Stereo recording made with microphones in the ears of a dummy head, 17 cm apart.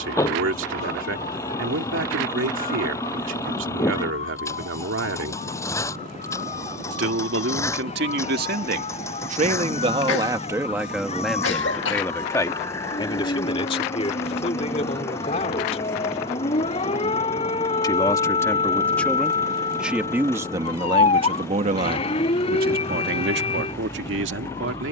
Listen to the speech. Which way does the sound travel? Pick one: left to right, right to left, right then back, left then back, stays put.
left then back.